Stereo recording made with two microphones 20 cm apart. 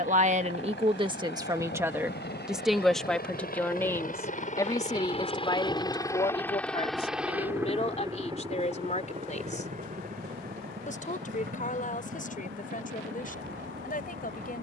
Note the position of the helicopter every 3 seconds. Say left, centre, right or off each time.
left, left, centre, right, right.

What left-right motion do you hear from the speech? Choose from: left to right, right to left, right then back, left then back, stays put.
right to left.